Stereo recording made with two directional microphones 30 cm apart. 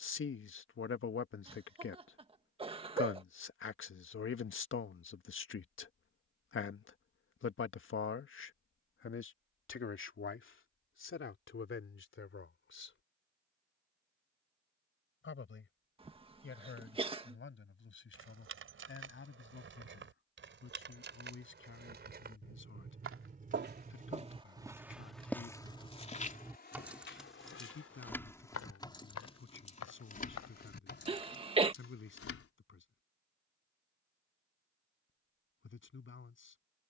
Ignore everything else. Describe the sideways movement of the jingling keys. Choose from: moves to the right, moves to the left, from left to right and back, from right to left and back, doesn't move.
moves to the left.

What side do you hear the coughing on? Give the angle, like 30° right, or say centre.
20° right.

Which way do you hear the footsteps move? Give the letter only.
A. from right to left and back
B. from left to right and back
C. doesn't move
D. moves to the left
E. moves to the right
D.